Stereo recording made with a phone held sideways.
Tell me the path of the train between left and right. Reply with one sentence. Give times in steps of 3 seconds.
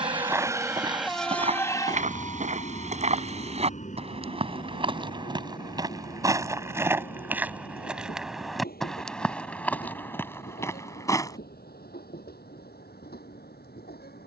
In this clip you hear the train in the centre from 0 s and on the left from 3 s.